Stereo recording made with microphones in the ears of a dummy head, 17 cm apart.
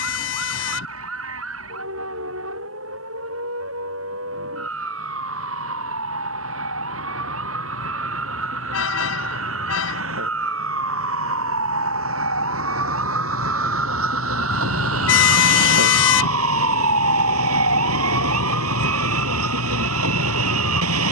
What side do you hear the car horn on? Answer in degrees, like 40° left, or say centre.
80° left.